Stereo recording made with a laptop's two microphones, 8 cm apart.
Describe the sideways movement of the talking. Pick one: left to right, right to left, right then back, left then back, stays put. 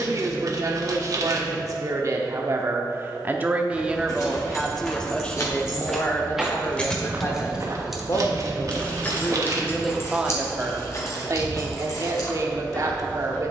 left then back.